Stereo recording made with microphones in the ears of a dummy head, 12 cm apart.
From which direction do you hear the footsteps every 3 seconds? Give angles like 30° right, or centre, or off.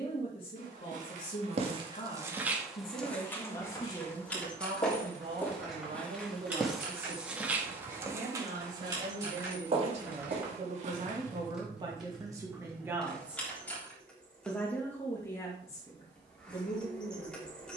40° right, 20° left, 10° right, 50° right, off, off.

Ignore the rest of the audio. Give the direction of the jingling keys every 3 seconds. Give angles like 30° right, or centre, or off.
off, 10° left, 20° right, 10° right, centre, off.